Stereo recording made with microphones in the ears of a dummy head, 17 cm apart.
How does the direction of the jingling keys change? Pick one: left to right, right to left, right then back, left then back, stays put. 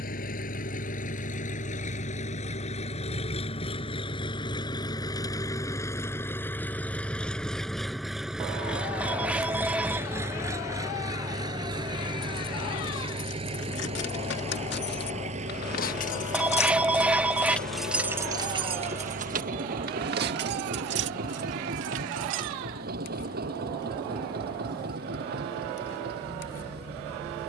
left to right.